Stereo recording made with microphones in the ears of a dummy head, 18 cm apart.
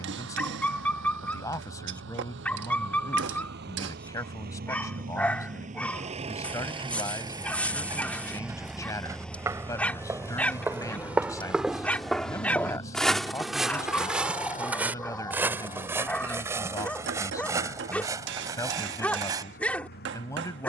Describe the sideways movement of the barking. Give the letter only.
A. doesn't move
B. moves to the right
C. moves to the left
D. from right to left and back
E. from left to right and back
A.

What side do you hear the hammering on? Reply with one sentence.
In this clip you hear the hammering on the right.